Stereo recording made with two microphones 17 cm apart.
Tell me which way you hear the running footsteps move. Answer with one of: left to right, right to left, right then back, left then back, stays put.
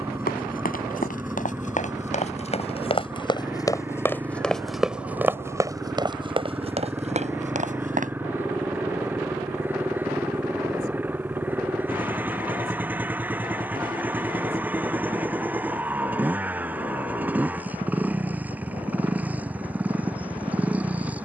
left to right.